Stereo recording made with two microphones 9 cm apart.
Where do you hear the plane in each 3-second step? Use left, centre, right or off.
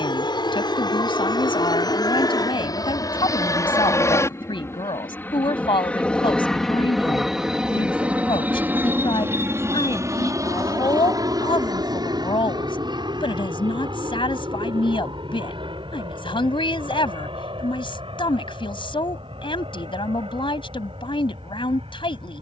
left, left, centre, right, right, right, right, right.